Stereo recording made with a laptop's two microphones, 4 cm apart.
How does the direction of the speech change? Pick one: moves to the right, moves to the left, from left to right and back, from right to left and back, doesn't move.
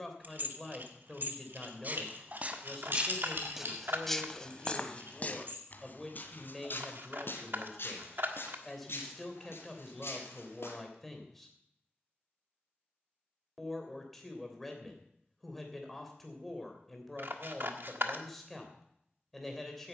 doesn't move.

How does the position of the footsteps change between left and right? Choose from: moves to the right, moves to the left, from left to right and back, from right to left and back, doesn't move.
moves to the left.